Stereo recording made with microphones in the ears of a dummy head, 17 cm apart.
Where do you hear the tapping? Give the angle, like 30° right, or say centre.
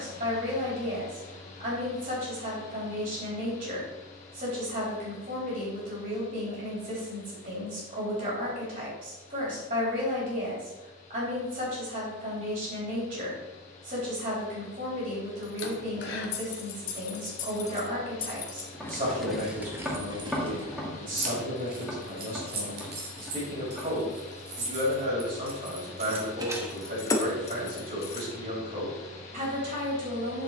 centre.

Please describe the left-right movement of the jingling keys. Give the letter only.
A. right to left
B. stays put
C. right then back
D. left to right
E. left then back
C.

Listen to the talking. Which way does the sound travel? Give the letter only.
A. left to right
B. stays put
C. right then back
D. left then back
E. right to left
B.